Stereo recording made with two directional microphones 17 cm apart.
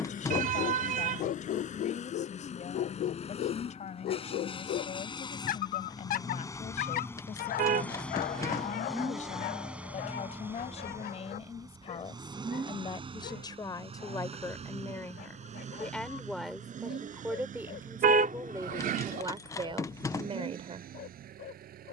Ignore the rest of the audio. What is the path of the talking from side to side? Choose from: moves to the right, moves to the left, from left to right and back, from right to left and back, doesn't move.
moves to the right.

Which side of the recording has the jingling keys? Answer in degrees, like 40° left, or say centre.
20° left.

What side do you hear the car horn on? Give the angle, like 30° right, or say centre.
60° right.